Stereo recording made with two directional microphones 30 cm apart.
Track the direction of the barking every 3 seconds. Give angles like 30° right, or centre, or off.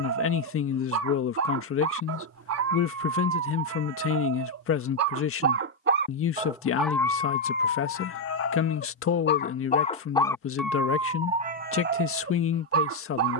60° right, 60° right, 30° left, centre, 50° right.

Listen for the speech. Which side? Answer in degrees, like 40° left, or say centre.
50° left.